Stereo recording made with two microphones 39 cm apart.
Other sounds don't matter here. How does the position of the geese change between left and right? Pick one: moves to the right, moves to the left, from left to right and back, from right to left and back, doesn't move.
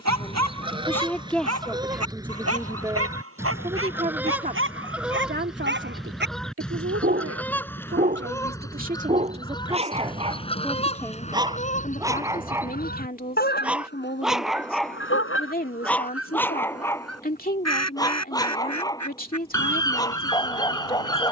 moves to the left.